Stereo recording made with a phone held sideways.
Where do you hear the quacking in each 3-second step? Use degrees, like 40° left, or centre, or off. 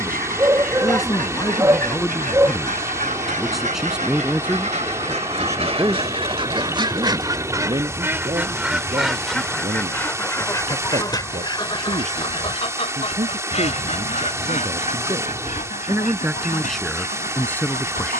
60° right, 50° right, 20° right, 20° left, 50° left, 60° left.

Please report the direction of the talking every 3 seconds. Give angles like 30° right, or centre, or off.
20° left, 10° right, 30° right, 50° right, 50° right, centre.